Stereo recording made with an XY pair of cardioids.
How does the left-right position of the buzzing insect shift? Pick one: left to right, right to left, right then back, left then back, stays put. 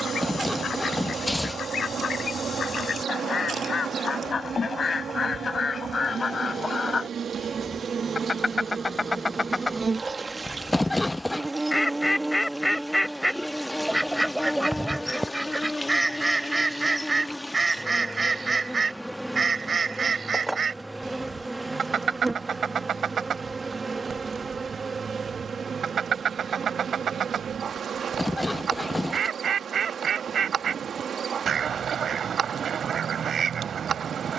left then back.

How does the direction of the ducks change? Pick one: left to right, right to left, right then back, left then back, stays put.
left to right.